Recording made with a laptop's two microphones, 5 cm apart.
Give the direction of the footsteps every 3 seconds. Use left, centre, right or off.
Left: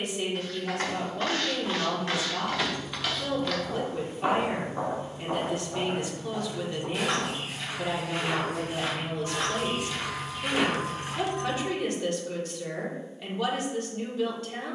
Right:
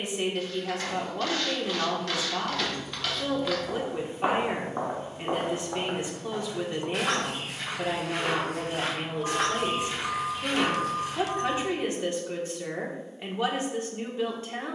left, right, right, centre, off.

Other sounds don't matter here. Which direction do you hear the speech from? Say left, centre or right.
right.